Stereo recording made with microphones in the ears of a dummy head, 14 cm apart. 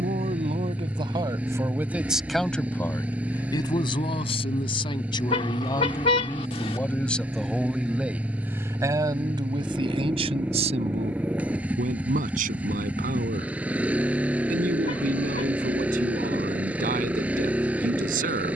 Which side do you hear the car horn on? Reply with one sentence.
In this clip you hear the car horn on the left.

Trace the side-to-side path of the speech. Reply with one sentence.
You can hear the speech go left and come back.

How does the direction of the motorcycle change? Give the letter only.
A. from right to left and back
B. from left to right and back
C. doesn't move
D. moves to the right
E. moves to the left
C.